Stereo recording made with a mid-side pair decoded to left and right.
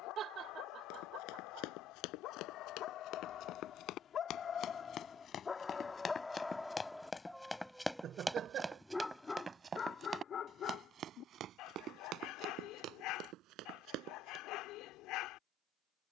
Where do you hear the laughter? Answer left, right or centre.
right.